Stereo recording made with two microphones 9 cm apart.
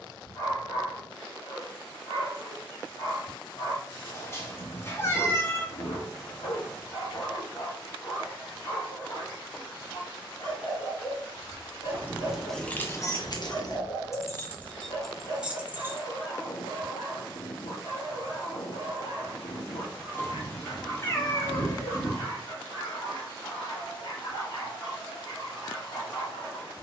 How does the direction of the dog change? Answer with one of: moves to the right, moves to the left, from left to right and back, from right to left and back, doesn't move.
doesn't move.